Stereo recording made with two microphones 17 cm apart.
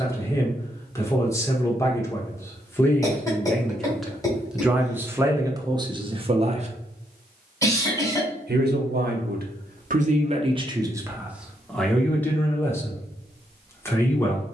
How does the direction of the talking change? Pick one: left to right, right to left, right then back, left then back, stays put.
right then back.